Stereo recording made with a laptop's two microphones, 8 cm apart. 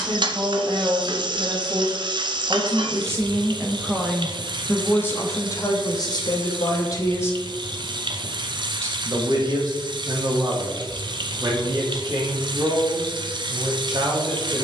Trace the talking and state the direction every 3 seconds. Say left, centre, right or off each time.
right, centre, left, right, right.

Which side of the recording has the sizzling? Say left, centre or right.
right.